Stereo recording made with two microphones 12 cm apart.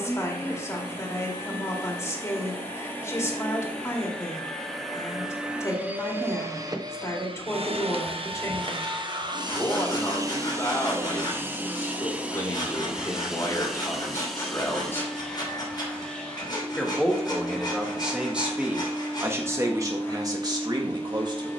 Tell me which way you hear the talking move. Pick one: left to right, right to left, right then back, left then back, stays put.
left to right.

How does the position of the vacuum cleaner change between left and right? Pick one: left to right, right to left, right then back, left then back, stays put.
right then back.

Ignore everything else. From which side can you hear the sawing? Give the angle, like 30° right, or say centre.
40° left.